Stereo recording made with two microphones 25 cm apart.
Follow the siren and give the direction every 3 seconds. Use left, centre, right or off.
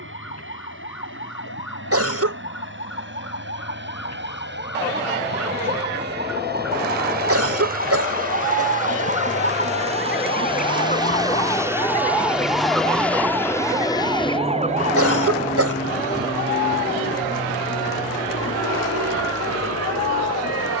left, left, left, left, centre, right, right.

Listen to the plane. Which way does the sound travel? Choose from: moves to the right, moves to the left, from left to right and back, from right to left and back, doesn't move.
moves to the left.